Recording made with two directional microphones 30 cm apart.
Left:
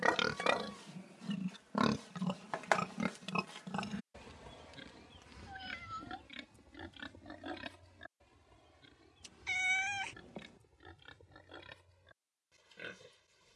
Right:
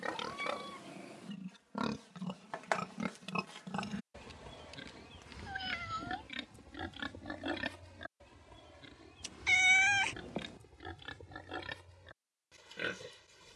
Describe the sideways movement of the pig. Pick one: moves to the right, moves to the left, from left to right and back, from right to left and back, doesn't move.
moves to the right.